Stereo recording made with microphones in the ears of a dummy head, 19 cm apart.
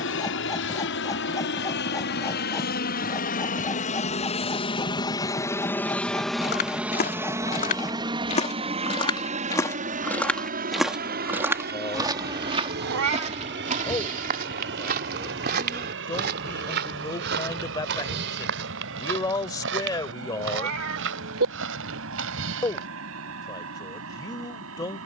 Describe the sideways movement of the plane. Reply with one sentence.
In this clip you hear the plane move from left to right.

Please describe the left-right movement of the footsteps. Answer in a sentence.
In this clip you hear the footsteps travel towards the right.